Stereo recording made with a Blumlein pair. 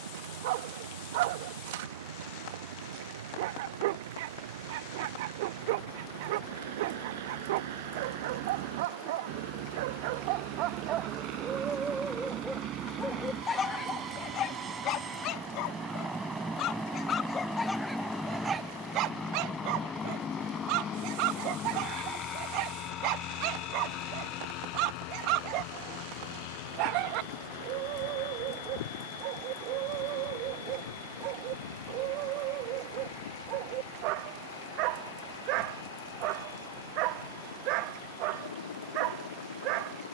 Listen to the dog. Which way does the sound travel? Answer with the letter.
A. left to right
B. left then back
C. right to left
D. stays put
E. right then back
B.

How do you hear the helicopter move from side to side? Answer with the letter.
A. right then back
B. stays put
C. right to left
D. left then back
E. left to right
C.